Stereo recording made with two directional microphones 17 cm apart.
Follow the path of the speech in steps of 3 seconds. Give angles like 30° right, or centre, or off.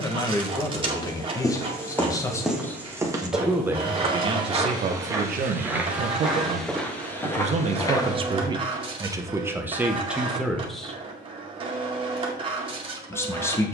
20° left, 40° right, 40° right, 10° right, 10° left.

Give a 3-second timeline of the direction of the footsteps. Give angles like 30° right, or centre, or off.
10° left, 20° right, 10° left, off, off.